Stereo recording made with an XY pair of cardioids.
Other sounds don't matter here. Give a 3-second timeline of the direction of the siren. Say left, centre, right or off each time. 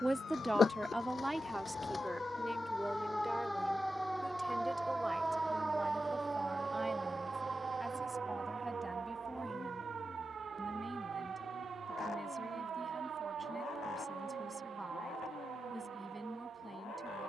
left, centre, right, right, right, right.